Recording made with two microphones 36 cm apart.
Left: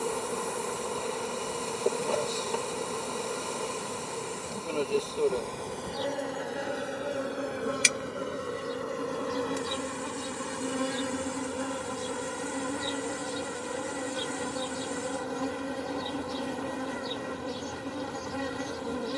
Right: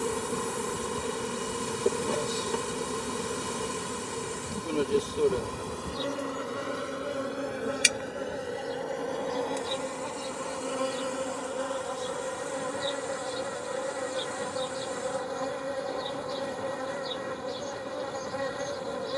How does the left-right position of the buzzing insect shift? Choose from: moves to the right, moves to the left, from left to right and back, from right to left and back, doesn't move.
moves to the left.